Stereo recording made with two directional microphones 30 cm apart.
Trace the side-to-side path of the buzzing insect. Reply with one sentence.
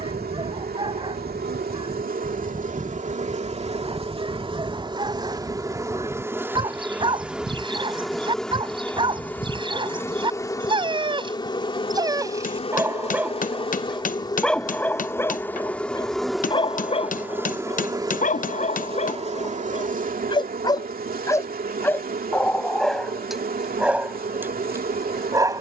You can hear the buzzing insect move from right to left and back again.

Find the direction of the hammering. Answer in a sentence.
You can hear the hammering on the left.